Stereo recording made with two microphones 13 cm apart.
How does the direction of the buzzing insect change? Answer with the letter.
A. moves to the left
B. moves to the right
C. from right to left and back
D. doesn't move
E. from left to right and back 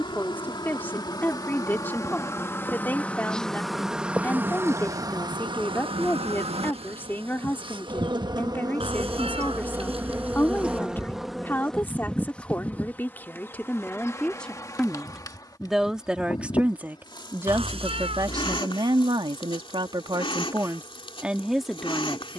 E.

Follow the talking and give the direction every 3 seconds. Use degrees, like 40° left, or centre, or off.
20° left, 20° left, 20° left, 20° left, 10° left, 10° right, 30° right, centre.